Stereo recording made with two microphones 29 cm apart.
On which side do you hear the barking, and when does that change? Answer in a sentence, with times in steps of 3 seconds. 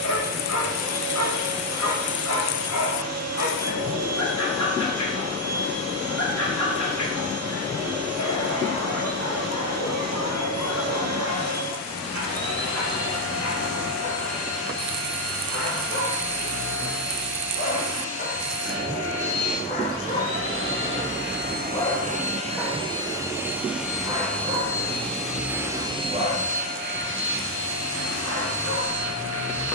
In this clip you hear the barking on the left from 0 s, in the centre from 21 s and on the right from 24 s.